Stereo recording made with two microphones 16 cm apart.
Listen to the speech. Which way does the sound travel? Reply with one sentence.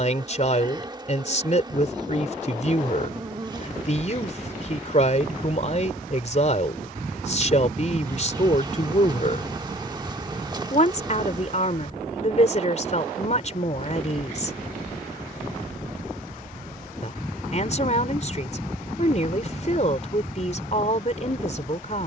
You can hear the speech stay put.